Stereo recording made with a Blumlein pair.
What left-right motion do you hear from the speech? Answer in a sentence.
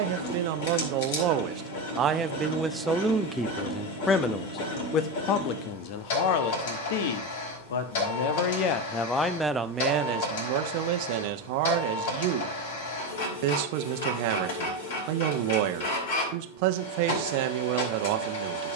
In this clip you hear the speech go left and come back.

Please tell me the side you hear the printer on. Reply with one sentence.
You can hear the printer on the left.